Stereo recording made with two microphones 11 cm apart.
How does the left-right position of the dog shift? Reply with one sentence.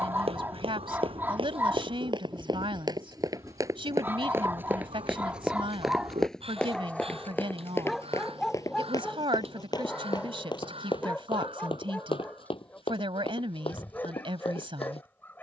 You can hear the dog travel towards the left.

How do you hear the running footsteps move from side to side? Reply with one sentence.
You can hear the running footsteps travel towards the left.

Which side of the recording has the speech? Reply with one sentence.
You can hear the speech on the right.